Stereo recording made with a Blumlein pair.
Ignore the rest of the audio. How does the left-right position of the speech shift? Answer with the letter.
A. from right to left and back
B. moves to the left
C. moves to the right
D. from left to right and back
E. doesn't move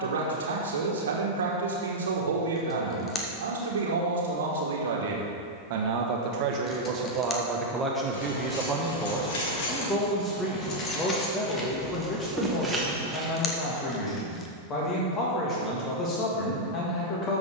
B.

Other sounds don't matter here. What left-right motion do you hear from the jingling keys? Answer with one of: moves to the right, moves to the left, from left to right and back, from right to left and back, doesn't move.
moves to the right.